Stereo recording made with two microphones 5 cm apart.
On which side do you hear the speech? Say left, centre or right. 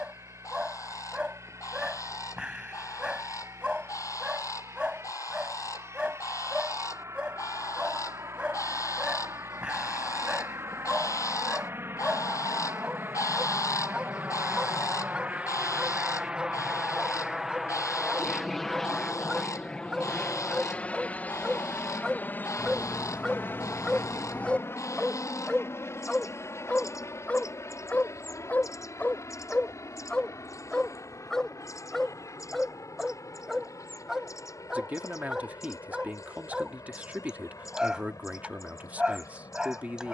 right.